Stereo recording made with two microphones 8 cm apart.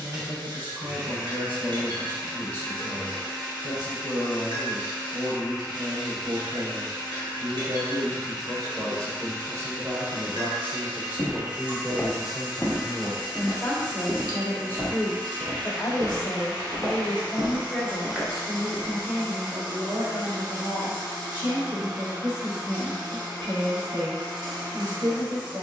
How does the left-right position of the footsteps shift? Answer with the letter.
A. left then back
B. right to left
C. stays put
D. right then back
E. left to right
D.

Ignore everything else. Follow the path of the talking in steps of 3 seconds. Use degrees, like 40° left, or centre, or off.
60° right, 60° right, 50° right, 30° right, 10° left, 30° left, 40° right, 60° right, 60° right.